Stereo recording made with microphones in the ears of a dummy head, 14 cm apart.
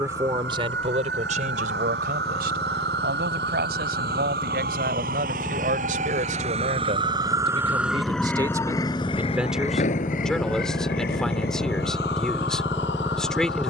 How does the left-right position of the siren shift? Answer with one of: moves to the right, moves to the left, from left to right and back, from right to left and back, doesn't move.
moves to the left.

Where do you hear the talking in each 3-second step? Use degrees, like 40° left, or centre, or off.
40° right, 60° right, 40° right, centre, centre.